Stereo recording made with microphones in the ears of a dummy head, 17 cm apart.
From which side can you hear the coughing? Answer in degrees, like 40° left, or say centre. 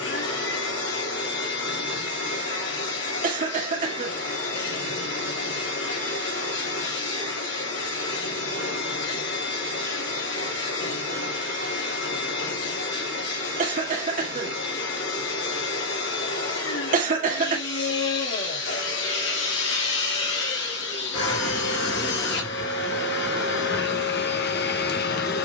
40° right.